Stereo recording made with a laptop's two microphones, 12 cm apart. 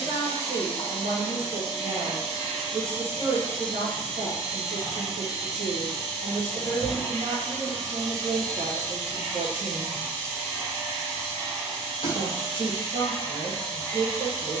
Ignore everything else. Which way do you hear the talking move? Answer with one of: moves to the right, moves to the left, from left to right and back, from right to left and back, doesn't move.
doesn't move.